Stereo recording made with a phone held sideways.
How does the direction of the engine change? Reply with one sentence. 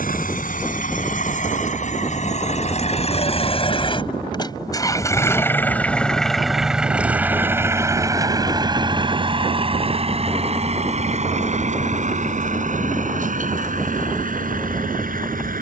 In this clip you hear the engine move from left to right.